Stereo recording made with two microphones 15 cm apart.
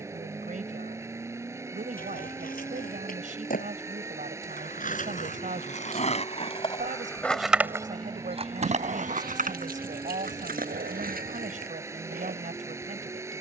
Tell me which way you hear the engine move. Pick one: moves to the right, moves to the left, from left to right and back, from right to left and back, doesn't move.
doesn't move.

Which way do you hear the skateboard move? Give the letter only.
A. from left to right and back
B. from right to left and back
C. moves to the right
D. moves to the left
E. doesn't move
C.